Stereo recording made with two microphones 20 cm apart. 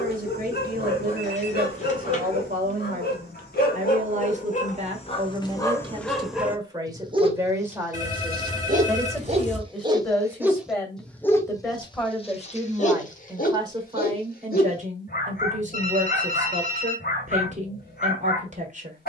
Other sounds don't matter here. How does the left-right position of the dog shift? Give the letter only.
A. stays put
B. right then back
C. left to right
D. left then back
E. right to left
B.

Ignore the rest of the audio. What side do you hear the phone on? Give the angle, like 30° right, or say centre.
40° left.